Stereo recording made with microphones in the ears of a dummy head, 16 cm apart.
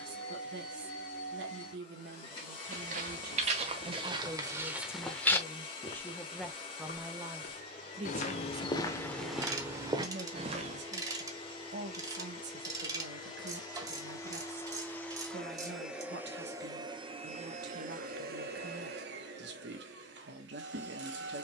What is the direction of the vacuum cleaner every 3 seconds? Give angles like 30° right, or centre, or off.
30° left, 30° left, 30° left, 30° left, 20° left, 20° right, 60° right.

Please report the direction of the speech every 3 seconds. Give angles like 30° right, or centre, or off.
70° right, 10° right, 10° right, 60° right, 70° right, 70° right, 70° right.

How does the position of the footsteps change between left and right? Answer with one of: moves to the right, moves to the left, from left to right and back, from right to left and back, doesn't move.
from right to left and back.